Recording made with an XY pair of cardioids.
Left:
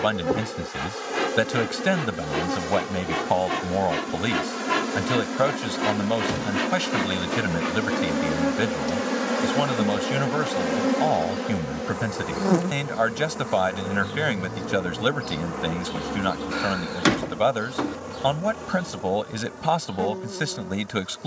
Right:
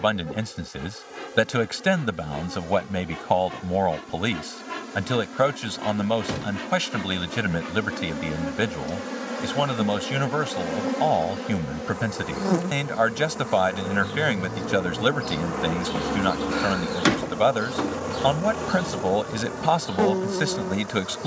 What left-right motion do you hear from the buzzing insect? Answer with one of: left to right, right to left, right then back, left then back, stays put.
left to right.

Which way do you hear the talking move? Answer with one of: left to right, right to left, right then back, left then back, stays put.
stays put.